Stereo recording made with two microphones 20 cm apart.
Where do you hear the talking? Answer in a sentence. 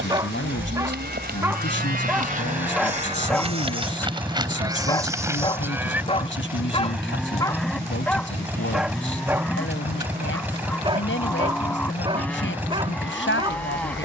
In this clip you hear the talking on the left.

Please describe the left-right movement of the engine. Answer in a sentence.
You can hear the engine stay in one place.